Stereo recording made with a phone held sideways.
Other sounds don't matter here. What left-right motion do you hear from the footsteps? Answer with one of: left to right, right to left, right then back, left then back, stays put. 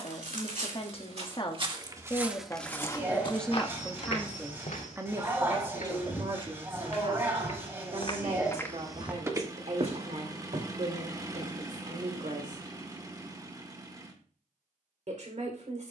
left then back.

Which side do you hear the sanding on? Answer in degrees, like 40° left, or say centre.
20° right.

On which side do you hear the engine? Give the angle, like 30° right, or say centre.
20° right.